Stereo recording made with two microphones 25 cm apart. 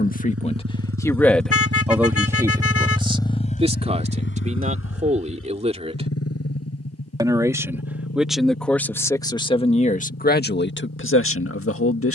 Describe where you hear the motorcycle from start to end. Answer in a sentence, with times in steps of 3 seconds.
You can hear the motorcycle on the right from 0 s and on the left from 3 s.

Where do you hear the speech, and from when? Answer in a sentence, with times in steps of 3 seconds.
In this clip you hear the speech in the centre from 0 s, on the right from 3 s, in the centre from 6 s and on the left from 9 s.